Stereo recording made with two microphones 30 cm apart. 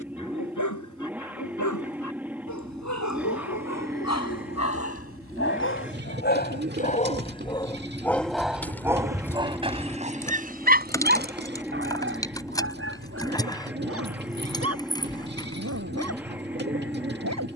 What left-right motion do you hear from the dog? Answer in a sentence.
You can hear the dog go from the left side to the right.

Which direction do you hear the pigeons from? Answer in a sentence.
You can hear the pigeons on the right.